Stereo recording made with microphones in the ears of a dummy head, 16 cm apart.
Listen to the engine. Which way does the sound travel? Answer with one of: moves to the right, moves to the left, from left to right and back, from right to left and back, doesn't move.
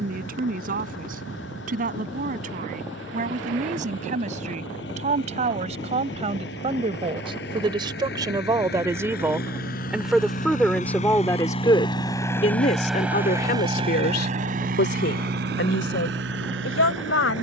moves to the right.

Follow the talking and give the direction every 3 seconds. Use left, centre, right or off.
right, right, right, centre, left, left.